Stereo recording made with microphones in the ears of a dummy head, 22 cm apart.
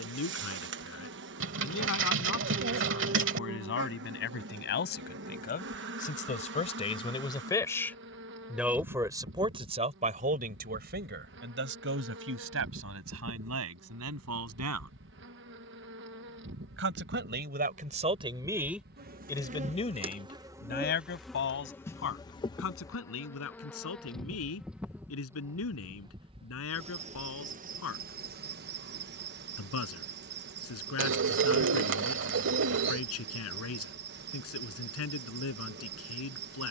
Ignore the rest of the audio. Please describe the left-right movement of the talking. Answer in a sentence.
In this clip you hear the talking go right and come back.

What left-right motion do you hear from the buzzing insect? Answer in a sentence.
In this clip you hear the buzzing insect move from right to left and back again.